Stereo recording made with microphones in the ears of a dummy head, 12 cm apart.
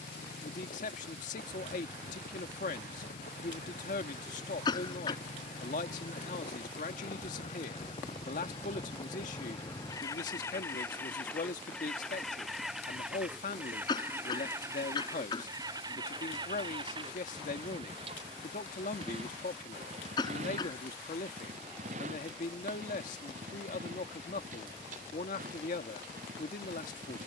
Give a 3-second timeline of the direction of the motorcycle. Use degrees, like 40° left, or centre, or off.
70° left, 60° left, 40° left, 20° left, 10° right, 30° right, 50° right, 60° right, 60° right.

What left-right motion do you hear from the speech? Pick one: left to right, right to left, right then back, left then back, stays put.
stays put.